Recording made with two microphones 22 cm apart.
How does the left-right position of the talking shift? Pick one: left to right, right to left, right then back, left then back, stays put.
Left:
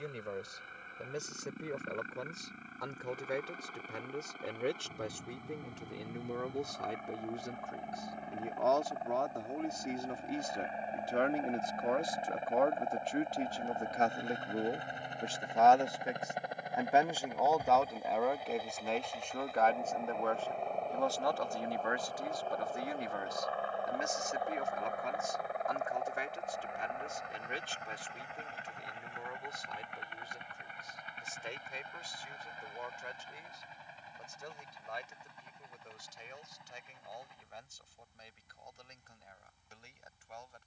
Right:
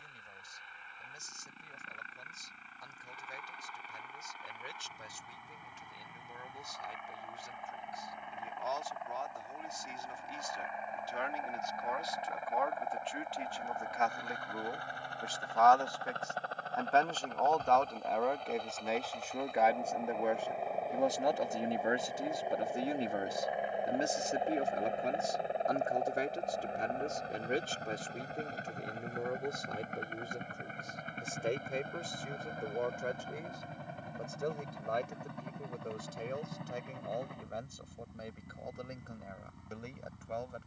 left to right.